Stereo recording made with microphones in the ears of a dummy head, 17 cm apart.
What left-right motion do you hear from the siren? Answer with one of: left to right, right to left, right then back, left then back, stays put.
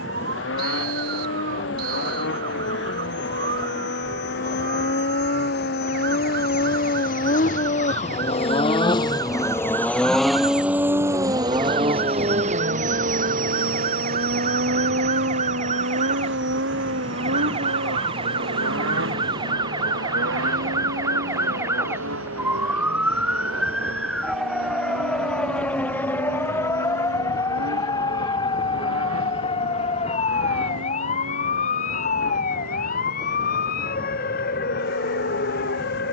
right to left.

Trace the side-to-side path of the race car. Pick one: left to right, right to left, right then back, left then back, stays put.
left to right.